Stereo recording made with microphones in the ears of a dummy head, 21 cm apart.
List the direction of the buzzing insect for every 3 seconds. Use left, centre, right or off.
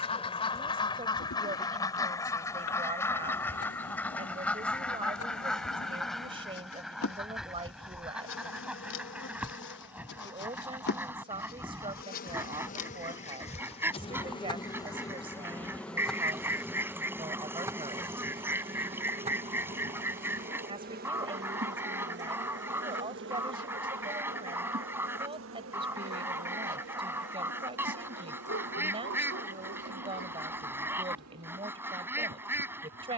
left, left, left, left, left, centre, right, right, right, right, right.